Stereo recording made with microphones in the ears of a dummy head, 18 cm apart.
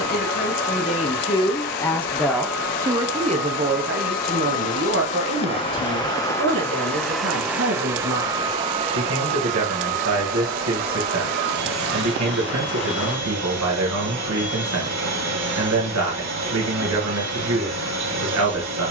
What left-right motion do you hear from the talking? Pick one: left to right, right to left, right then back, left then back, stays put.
left to right.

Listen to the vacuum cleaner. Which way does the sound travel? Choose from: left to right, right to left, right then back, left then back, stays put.
left to right.